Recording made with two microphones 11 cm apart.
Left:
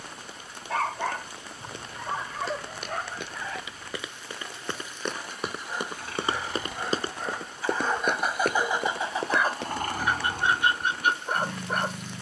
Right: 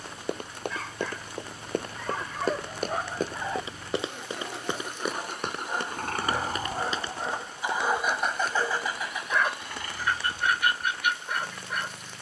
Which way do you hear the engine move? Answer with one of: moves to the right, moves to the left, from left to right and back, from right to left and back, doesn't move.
moves to the left.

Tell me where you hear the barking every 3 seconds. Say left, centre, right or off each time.
left, right, centre, left.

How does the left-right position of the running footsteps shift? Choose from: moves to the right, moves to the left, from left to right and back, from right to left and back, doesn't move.
moves to the left.